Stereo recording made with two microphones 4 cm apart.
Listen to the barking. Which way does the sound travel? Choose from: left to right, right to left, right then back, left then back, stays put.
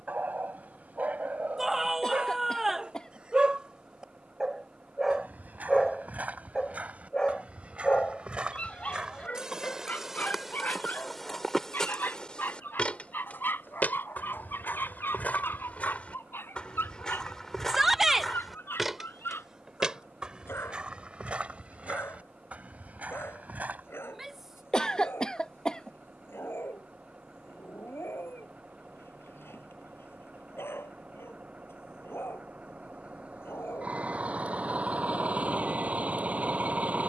right to left.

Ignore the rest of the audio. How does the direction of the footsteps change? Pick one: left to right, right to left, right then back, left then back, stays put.
left then back.